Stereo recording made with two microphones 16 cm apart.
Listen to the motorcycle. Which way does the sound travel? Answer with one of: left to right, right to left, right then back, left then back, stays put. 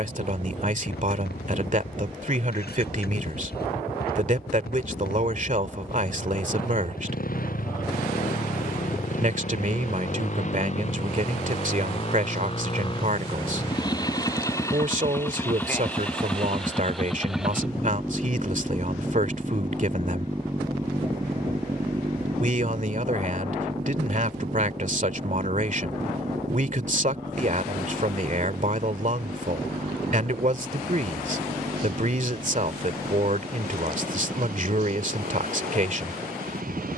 left to right.